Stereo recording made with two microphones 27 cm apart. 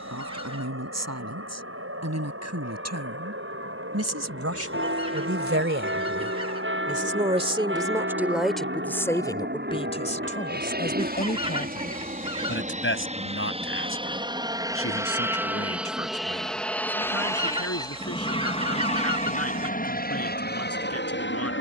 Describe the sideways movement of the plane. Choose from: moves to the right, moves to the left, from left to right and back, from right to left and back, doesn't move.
moves to the left.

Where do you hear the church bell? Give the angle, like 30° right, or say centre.
50° right.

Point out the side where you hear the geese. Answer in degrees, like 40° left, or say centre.
20° right.